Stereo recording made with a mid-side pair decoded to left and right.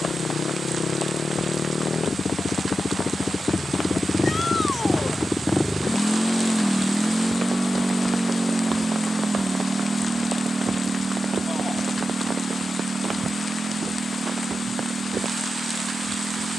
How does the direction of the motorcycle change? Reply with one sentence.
In this clip you hear the motorcycle travel towards the right.